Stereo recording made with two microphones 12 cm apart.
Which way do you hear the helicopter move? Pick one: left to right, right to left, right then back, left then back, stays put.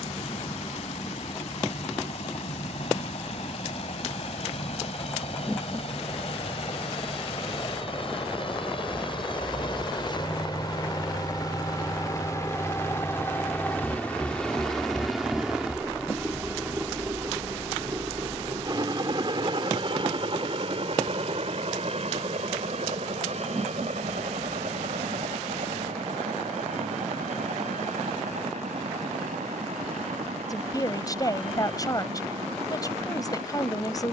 left to right.